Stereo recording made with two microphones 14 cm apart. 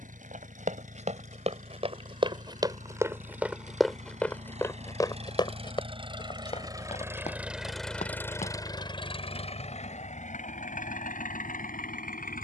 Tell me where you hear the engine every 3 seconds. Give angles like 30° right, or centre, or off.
60° right, 50° right, centre, 60° left.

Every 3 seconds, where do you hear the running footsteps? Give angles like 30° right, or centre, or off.
50° right, 10° left, 50° left, off.